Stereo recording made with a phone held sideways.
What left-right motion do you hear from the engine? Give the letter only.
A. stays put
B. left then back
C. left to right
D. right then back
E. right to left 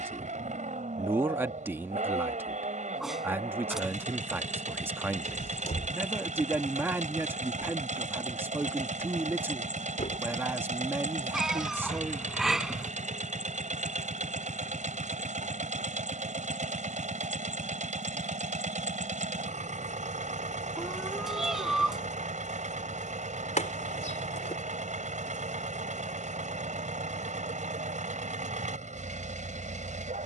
A.